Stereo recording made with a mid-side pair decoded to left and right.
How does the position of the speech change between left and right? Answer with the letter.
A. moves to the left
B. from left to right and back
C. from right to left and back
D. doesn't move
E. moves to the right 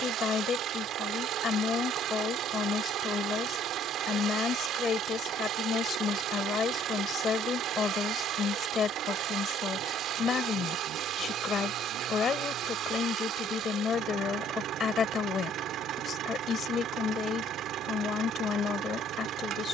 D.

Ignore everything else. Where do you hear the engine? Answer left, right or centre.
right.